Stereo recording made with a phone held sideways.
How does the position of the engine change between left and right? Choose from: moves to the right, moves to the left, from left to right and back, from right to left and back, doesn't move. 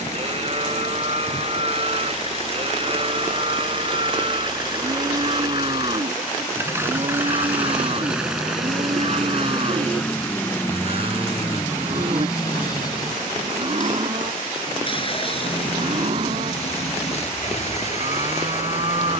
moves to the left.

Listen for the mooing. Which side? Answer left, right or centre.
right.